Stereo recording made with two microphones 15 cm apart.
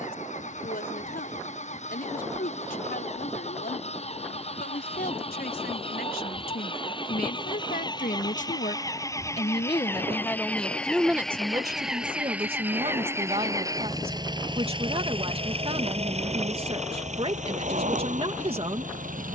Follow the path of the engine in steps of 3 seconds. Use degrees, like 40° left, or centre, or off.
50° left, 40° left, 30° left, 10° left, 20° right, 50° right, 60° right.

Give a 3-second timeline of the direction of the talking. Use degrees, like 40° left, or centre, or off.
80° left, 80° left, 70° left, 10° left, 40° right, 40° right, 40° right.